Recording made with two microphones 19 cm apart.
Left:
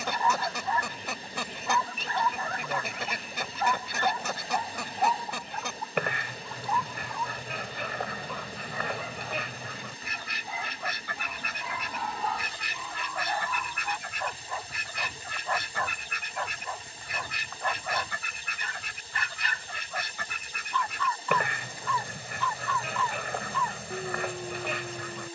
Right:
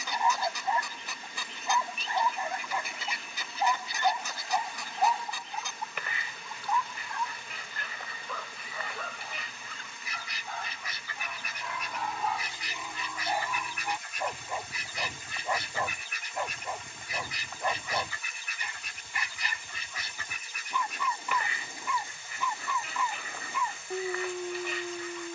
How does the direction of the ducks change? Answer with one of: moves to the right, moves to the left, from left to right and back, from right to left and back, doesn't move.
doesn't move.